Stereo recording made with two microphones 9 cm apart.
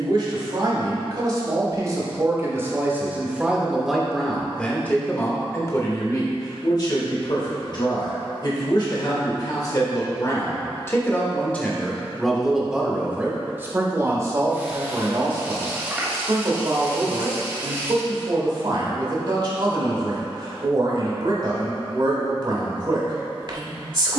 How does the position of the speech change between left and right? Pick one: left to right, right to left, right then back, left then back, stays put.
left then back.